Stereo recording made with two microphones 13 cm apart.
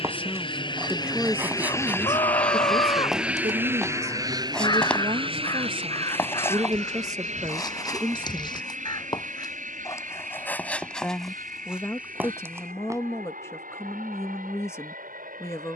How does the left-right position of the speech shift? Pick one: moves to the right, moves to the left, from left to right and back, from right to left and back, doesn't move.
from left to right and back.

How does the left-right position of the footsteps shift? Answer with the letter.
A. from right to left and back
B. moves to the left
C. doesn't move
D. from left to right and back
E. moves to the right
A.